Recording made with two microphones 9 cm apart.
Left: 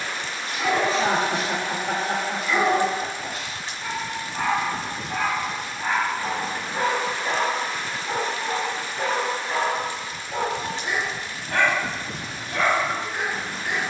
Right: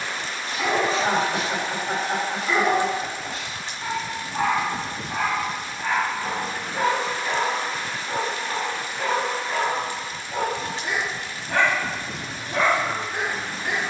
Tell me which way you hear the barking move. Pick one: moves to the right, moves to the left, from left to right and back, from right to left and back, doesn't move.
from right to left and back.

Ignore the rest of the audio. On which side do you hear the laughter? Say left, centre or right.
left.